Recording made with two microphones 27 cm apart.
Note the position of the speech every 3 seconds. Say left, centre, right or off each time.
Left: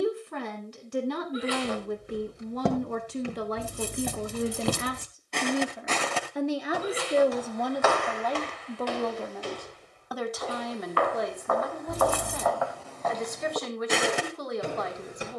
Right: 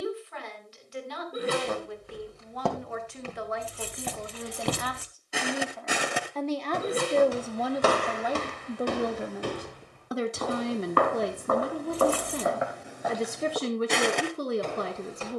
left, left, centre, right, right.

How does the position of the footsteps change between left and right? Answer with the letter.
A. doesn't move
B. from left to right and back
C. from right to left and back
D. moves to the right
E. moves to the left
B.